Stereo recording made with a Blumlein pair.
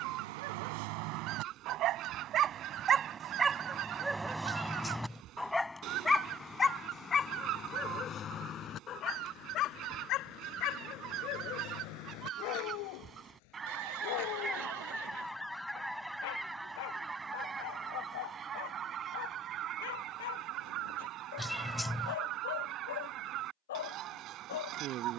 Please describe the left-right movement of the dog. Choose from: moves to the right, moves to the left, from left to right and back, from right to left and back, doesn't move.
moves to the left.